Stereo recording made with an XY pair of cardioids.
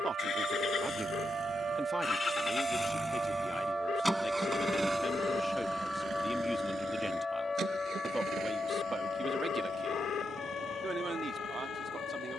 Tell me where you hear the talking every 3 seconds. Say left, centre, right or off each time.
centre, left, centre, right.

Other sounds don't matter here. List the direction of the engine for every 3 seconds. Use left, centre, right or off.
left, centre, right, right.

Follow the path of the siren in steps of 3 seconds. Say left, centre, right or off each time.
right, centre, left, left.